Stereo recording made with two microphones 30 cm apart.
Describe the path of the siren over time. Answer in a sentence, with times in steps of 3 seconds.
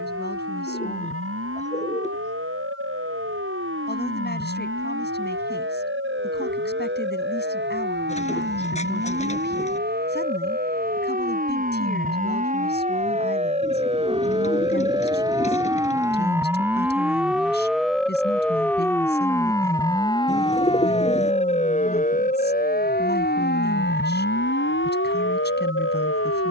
In this clip you hear the siren on the right from 0 s, in the centre from 15 s and on the left from 21 s.